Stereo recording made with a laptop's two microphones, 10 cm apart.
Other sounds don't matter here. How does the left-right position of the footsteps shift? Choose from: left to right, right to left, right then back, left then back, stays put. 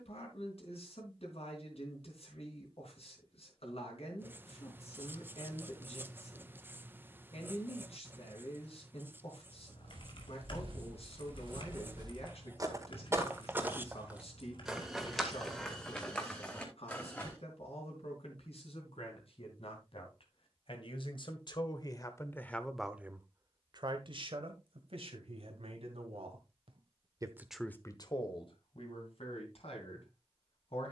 right to left.